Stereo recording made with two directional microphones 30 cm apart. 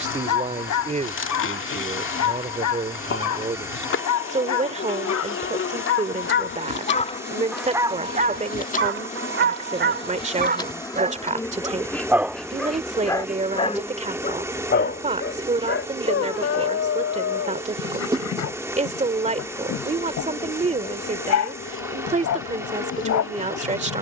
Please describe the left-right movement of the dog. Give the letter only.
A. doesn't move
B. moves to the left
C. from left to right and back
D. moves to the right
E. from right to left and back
C.